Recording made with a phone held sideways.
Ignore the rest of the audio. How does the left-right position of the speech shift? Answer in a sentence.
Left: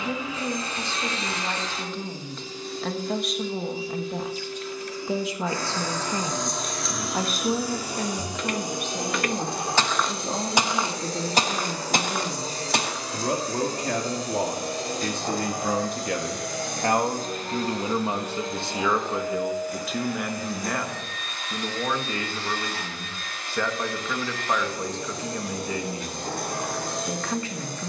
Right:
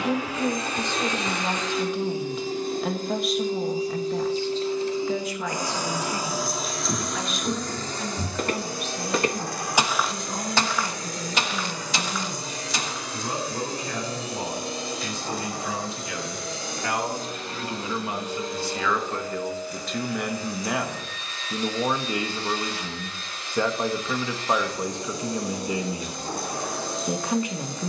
You can hear the speech move from right to left and back again.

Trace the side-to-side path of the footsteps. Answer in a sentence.
In this clip you hear the footsteps move from right to left.